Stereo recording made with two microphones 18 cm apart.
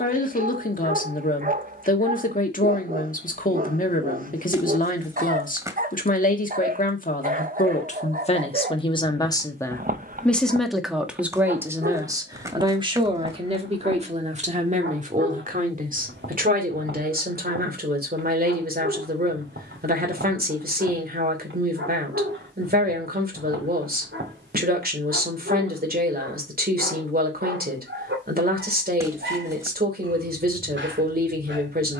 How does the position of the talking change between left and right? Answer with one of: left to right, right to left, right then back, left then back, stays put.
left to right.